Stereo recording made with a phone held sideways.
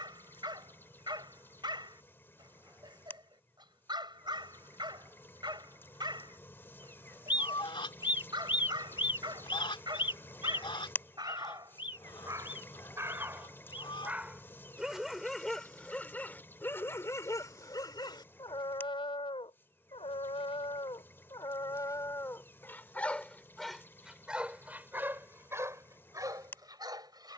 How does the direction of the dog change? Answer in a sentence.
You can hear the dog go left and come back.